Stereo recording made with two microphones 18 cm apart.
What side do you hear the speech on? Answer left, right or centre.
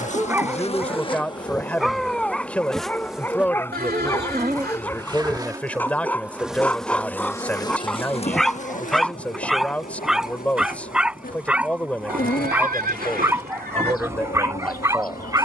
centre.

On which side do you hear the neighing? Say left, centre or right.
right.